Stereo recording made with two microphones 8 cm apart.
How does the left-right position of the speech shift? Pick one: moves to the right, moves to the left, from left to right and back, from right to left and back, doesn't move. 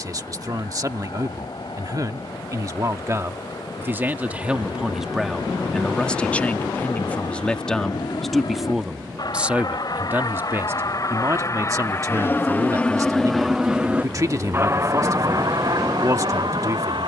from right to left and back.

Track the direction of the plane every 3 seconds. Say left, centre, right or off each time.
left, left, left, left, centre, right.